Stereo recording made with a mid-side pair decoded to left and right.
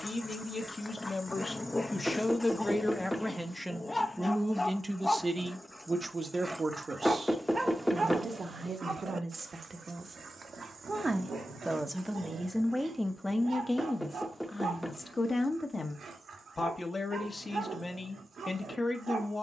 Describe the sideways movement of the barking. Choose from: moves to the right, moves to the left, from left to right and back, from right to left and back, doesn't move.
moves to the right.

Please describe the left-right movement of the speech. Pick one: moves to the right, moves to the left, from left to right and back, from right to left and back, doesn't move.
from left to right and back.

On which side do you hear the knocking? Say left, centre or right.
centre.